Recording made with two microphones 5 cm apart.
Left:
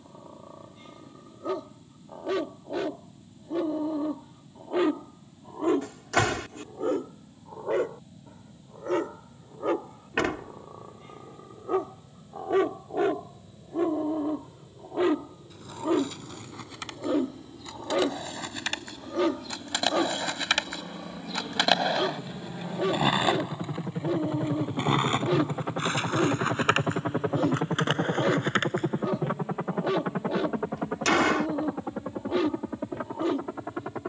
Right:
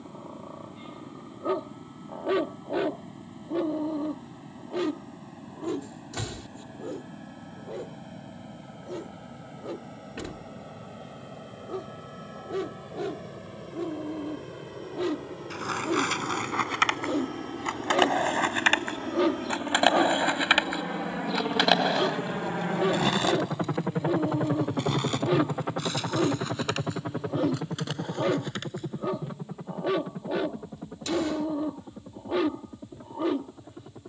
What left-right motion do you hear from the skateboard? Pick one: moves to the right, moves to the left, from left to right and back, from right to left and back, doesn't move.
moves to the left.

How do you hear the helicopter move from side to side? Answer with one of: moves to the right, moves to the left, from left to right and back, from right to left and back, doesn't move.
moves to the left.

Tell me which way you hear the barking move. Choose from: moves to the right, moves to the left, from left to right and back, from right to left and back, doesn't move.
from right to left and back.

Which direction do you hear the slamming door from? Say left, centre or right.
left.